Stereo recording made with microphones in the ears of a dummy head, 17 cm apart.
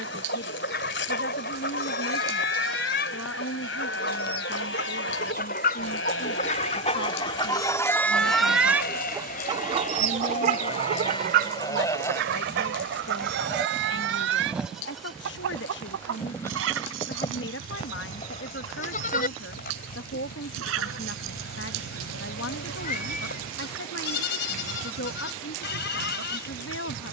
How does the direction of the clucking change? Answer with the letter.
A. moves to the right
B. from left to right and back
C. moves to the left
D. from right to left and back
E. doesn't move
A.